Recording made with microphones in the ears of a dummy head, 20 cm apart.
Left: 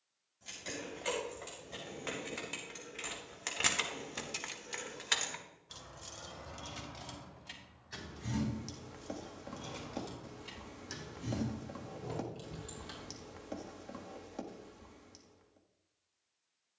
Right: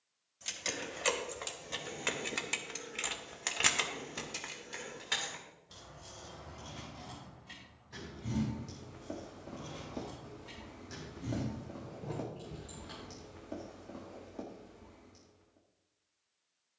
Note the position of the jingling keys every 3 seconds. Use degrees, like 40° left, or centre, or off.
50° right, 10° left, 60° left, 70° left, 70° left, off.